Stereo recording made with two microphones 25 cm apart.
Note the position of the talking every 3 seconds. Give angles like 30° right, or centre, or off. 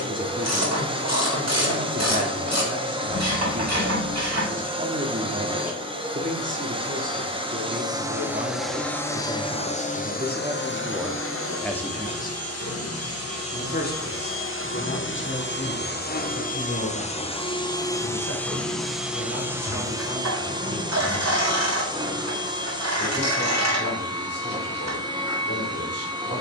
30° right, 30° right, 30° right, 20° right, 40° left, 50° left, 60° left, 60° left, 60° left.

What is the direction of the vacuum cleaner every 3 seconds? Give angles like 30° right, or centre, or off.
20° right, 20° right, 10° right, 40° left, 60° left, 30° left, 10° right, 20° right, 20° right.